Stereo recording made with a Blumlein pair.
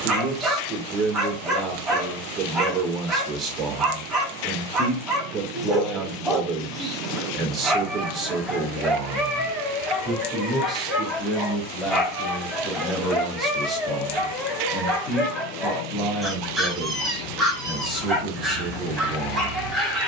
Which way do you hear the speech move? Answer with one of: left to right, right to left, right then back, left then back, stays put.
right to left.